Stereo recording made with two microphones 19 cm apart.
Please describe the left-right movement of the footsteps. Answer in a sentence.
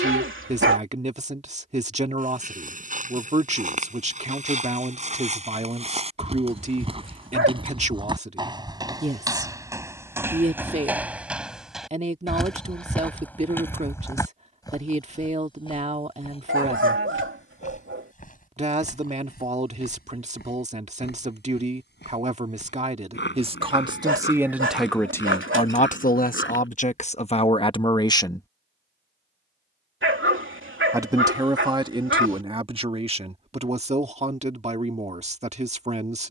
In this clip you hear the footsteps move from right to left.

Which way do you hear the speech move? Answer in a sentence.
You can hear the speech move from right to left and back again.